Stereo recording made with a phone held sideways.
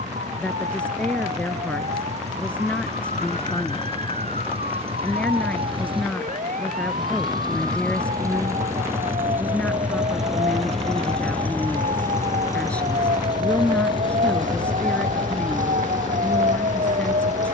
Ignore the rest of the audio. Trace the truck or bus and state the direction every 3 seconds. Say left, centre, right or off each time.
right, right, right, centre, left, left.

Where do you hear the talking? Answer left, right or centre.
centre.